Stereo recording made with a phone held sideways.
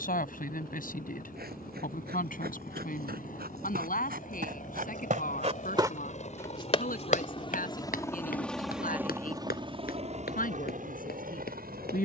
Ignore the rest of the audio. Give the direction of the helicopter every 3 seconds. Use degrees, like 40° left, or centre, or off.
70° left, 60° left, 30° left, 50° right.